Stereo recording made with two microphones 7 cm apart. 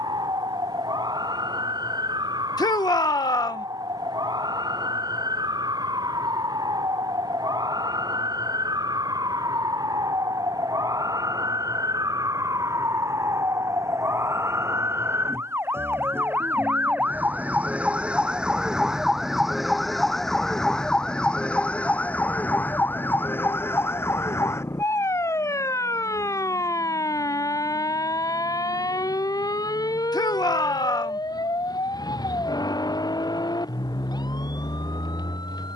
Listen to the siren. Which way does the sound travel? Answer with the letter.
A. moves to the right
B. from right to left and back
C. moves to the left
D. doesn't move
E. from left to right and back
C.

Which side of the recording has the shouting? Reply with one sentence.
In this clip you hear the shouting on the left.